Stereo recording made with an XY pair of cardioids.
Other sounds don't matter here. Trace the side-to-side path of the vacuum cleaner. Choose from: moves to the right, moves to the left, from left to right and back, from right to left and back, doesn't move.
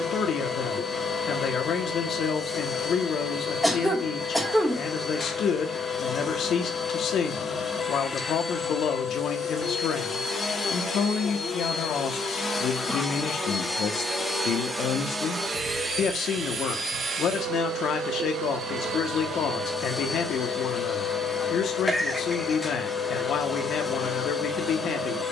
from left to right and back.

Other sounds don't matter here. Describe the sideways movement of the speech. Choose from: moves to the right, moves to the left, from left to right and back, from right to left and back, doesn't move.
doesn't move.